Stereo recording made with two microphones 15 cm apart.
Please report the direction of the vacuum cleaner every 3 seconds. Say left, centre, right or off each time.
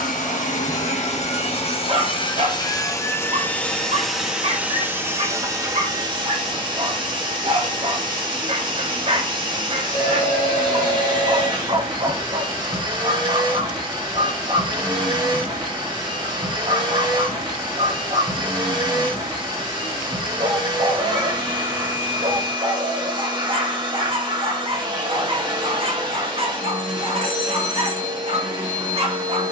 left, centre, right, right, right, right, right, right, right, right.